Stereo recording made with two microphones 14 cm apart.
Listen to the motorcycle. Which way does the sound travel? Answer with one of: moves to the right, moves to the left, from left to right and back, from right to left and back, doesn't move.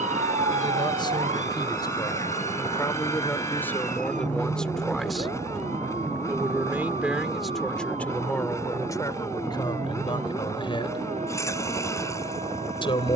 doesn't move.